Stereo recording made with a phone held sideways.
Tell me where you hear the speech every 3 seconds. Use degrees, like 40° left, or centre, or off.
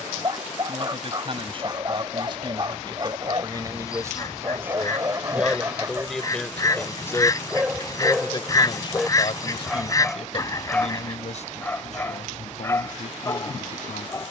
40° right, 20° right, 20° left, 50° left, 70° left.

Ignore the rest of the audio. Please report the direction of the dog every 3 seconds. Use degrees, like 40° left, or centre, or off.
30° right, 30° right, 10° right, 10° left, 20° left.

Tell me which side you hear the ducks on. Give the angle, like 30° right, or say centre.
20° left.